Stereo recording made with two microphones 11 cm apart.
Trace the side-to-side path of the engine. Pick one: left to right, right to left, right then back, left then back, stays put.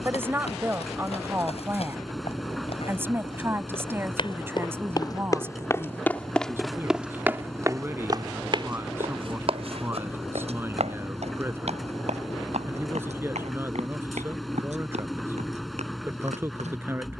stays put.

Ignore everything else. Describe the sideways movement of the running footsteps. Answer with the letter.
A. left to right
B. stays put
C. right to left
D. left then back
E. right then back
A.